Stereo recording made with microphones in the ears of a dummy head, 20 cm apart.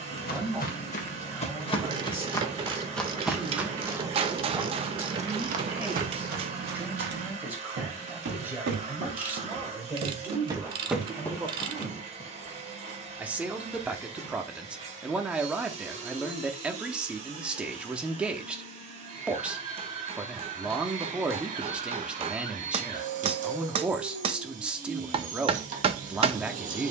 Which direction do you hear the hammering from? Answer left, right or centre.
right.